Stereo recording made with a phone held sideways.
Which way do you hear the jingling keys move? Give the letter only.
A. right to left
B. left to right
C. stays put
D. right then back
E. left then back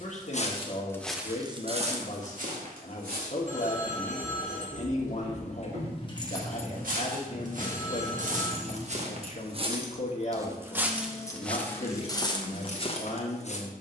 D.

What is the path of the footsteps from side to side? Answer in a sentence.
You can hear the footsteps go right and come back.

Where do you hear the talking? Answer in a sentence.
In this clip you hear the talking on the left.